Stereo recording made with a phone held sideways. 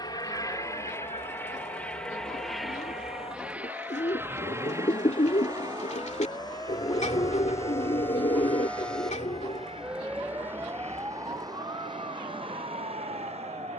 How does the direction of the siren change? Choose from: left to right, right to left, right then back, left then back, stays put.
left to right.